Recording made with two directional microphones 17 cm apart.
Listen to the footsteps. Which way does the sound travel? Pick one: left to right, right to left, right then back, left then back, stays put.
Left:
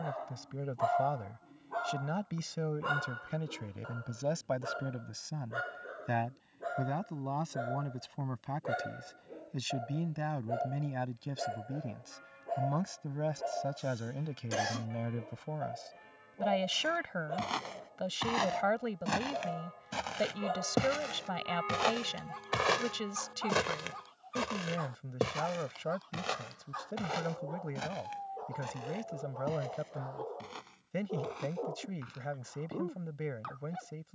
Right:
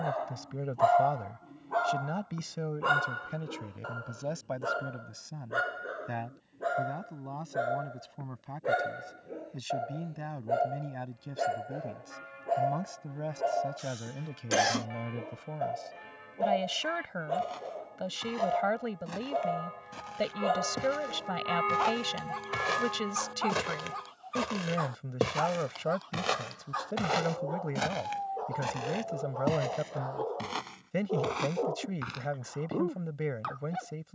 left to right.